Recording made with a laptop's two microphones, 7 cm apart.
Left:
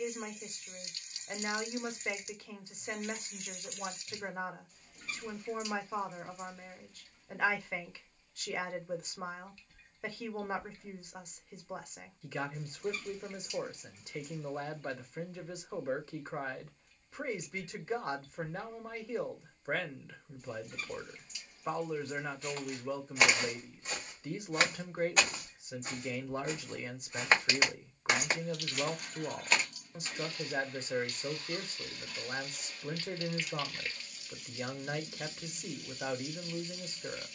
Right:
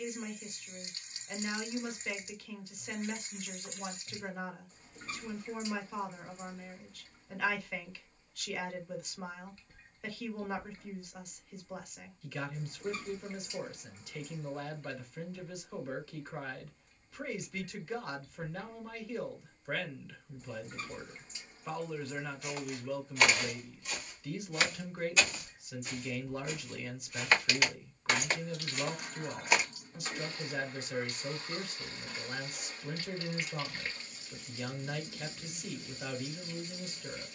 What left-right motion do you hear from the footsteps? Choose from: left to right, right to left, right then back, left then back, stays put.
left then back.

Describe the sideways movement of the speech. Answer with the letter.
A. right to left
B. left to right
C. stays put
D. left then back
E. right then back
C.